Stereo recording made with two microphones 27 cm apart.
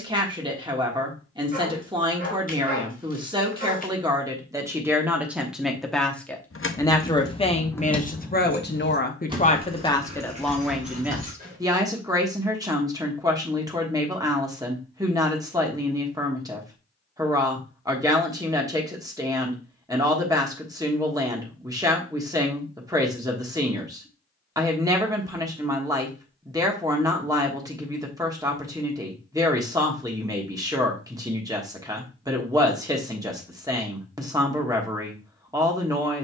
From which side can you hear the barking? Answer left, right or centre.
left.